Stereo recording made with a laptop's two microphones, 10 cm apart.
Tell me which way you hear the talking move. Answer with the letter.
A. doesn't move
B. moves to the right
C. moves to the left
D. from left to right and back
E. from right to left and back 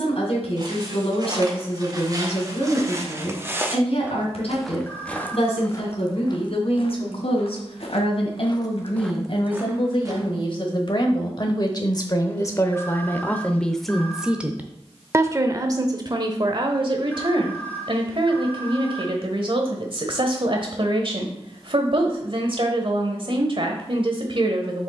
B.